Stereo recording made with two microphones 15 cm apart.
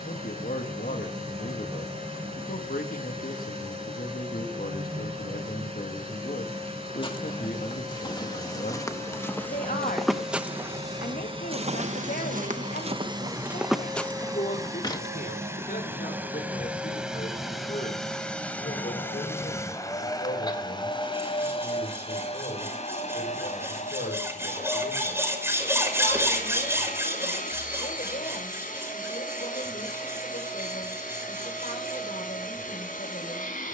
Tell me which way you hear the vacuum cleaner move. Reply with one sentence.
In this clip you hear the vacuum cleaner move from right to left.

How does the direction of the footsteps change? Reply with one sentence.
In this clip you hear the footsteps go right and come back.